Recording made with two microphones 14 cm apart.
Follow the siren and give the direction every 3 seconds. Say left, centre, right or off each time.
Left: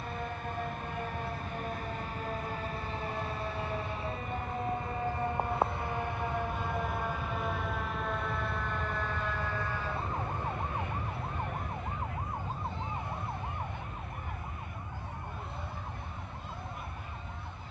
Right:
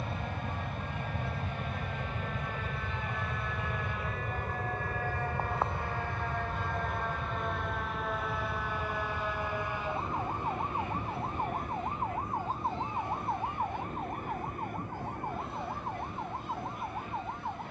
left, left, centre, right, right, right.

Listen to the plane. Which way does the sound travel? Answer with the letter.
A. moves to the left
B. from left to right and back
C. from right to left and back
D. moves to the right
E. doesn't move
A.